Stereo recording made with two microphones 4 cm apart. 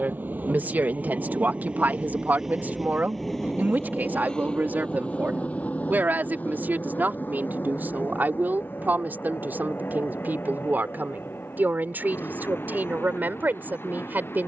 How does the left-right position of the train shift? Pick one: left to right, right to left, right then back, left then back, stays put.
right to left.